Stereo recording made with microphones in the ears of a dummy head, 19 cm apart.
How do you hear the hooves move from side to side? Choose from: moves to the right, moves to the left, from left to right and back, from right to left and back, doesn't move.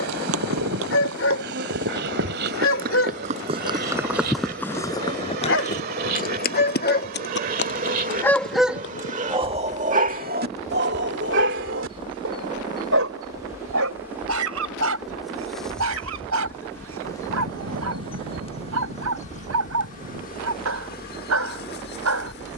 moves to the left.